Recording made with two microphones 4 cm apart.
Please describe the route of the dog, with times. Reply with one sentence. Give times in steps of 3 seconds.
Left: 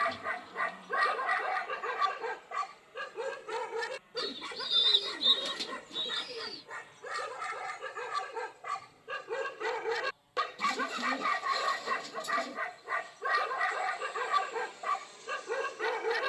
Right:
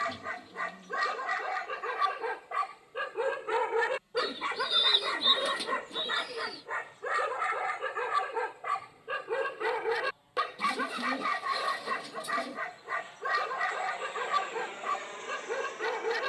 In this clip you hear the dog in the centre from 0 s, on the right from 3 s and in the centre from 9 s.